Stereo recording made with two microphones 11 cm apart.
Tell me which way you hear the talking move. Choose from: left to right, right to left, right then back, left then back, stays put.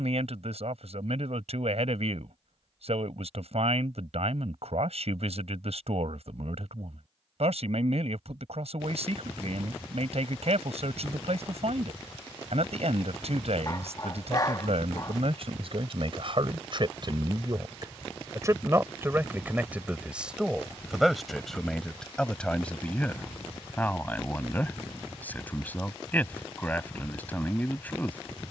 right to left.